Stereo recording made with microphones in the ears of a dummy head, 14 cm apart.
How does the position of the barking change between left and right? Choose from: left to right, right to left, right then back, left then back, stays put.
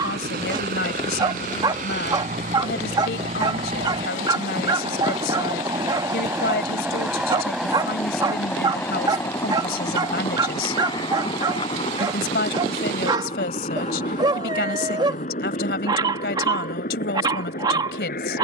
stays put.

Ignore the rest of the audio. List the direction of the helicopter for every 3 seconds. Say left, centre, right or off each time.
right, right, centre, left, left, left.